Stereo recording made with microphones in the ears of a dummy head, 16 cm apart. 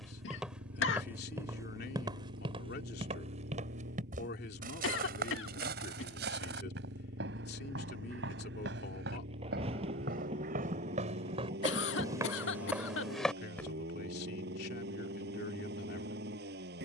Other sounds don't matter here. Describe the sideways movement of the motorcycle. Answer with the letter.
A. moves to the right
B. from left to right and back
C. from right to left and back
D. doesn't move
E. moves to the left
D.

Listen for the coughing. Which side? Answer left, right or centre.
left.